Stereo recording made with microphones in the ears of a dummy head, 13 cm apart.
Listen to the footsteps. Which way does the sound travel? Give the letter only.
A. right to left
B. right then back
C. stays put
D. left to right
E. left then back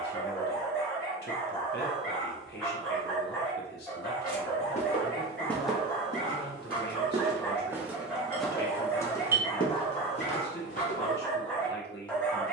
B.